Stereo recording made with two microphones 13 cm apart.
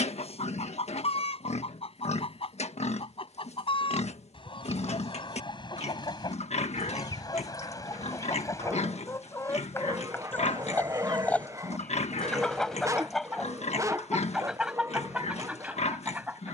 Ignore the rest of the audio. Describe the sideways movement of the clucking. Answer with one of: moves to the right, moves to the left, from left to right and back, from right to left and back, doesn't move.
moves to the right.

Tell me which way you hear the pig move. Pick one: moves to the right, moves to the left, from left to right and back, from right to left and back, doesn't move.
doesn't move.